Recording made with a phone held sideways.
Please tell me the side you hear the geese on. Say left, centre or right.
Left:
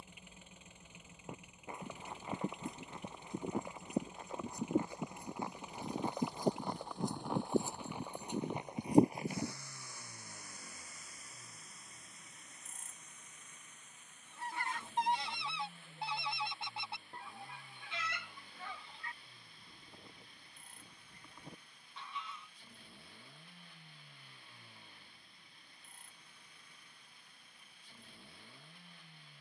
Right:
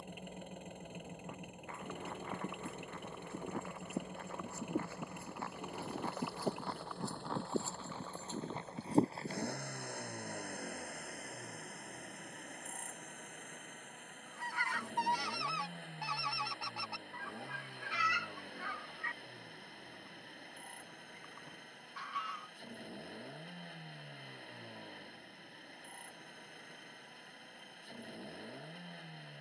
left.